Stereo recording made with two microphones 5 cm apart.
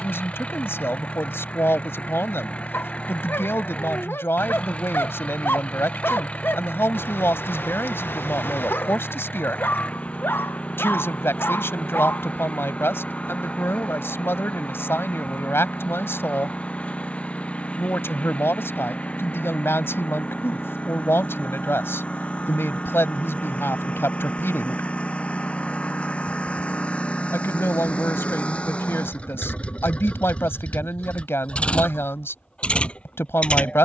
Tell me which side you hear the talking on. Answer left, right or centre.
left.